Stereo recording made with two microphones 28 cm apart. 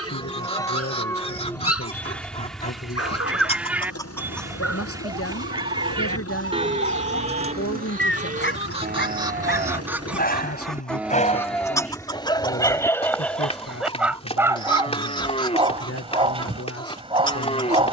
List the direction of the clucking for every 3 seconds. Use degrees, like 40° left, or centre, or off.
20° left, centre, 30° right, centre, 20° left, 20° left.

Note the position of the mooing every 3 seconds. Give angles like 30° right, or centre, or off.
10° left, 10° right, 30° right, 10° right, 20° left, 20° left.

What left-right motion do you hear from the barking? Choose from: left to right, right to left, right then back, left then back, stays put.
left to right.